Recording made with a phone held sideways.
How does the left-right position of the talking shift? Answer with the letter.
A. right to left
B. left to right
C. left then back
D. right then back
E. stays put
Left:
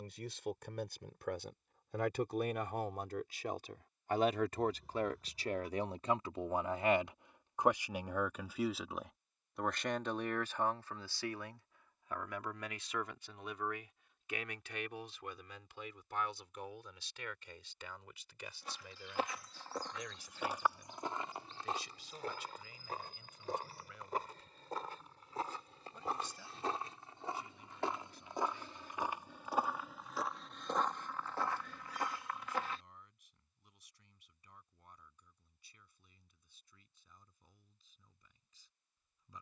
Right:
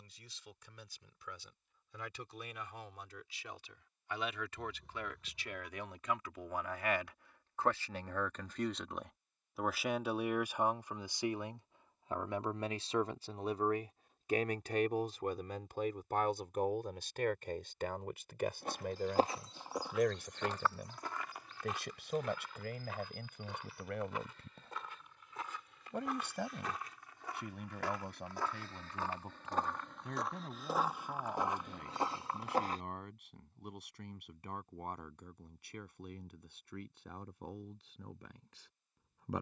B.